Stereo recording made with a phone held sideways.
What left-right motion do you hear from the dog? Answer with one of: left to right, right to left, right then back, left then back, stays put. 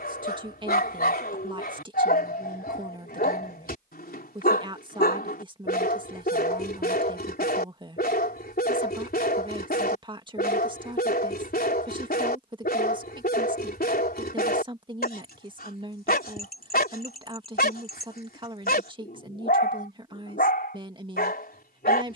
stays put.